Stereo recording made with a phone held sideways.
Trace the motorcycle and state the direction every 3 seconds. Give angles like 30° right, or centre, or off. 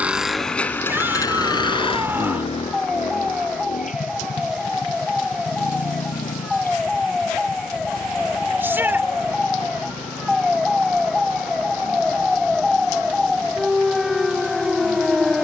20° left, 60° left, 70° left, 70° left, 70° left.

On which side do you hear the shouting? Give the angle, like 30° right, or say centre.
10° right.